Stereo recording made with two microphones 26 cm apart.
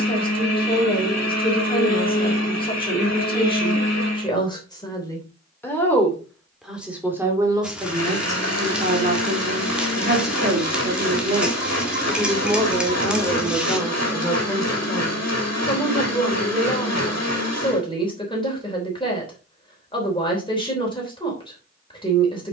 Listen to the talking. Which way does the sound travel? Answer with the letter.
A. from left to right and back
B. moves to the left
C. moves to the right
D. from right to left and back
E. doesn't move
A.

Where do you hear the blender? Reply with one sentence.
In this clip you hear the blender on the left.